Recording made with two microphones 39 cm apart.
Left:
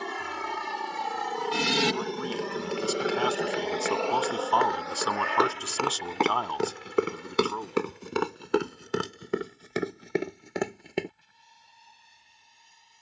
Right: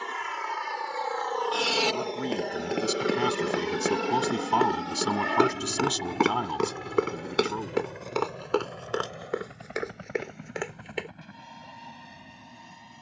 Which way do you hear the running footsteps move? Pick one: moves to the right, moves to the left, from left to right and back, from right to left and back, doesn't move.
moves to the left.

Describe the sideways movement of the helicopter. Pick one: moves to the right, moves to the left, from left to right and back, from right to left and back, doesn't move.
moves to the right.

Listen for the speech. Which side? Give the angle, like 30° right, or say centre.
40° right.